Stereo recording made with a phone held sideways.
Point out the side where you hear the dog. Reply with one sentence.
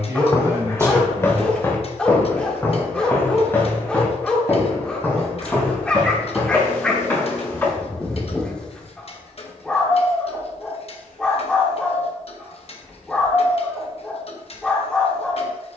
You can hear the dog in the centre.